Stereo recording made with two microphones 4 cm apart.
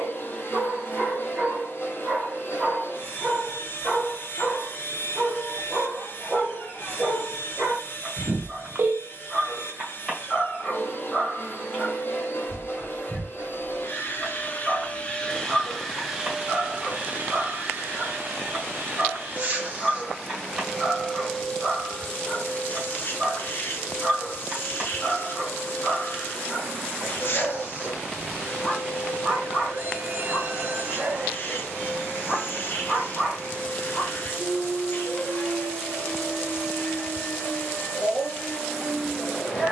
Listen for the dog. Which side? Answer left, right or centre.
centre.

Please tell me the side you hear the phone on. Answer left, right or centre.
right.